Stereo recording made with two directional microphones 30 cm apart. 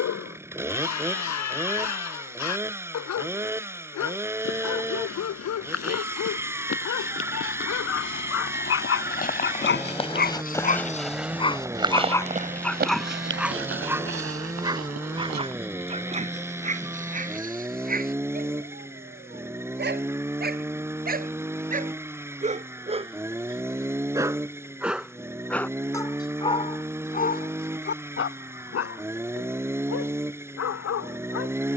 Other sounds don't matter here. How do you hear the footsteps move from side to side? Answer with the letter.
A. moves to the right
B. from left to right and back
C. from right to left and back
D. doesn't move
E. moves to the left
A.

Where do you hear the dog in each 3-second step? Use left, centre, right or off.
left, left, left, left, centre, right, right, right, centre, left, left.